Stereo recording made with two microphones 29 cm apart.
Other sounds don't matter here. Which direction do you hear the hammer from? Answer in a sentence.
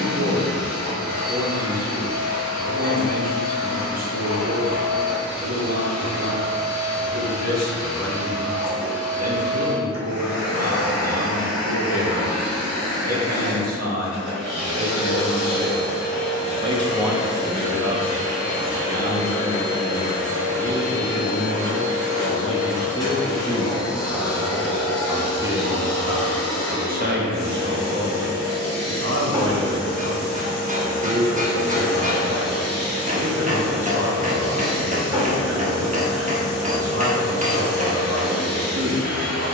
You can hear the hammer on the right.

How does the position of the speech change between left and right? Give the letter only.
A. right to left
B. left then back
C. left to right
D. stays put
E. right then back
B.